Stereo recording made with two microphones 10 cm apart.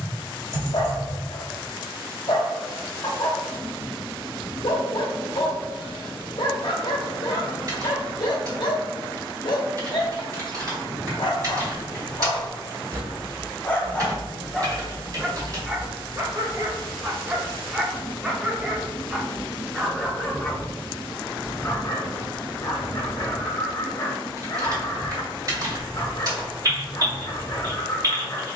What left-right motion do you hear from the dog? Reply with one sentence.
In this clip you hear the dog go right and come back.